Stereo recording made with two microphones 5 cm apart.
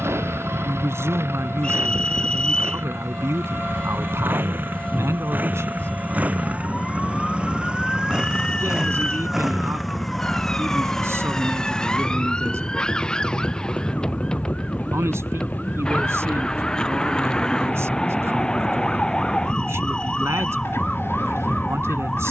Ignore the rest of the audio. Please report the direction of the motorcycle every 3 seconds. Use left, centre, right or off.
right, right, right, centre, left, left, left, left.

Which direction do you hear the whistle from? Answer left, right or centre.
left.